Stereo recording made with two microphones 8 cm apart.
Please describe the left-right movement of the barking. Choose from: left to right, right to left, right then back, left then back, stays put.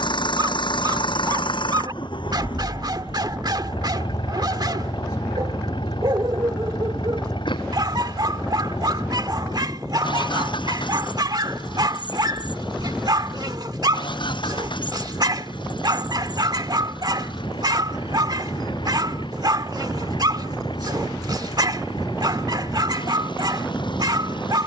stays put.